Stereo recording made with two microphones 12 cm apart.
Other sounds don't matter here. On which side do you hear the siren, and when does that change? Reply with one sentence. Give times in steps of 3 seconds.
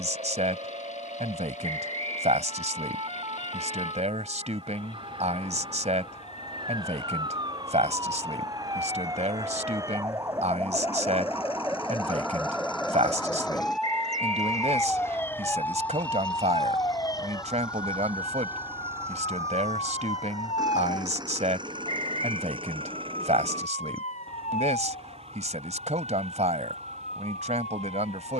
You can hear the siren on the right from 0 s, in the centre from 12 s and on the left from 15 s.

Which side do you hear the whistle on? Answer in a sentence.
In this clip you hear the whistle on the right.